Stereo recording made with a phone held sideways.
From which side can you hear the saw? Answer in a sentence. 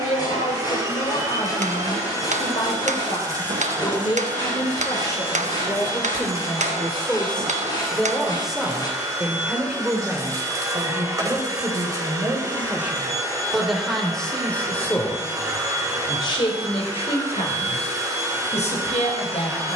In this clip you hear the saw on the left.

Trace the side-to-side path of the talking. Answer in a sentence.
In this clip you hear the talking move from left to right and back again.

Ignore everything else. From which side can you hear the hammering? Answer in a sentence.
You can hear the hammering on the right.